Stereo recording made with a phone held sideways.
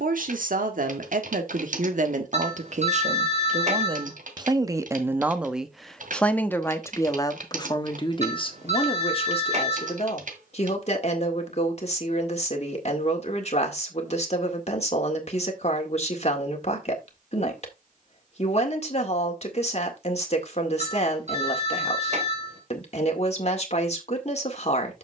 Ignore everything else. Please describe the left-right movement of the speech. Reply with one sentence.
You can hear the speech go from the right side to the left.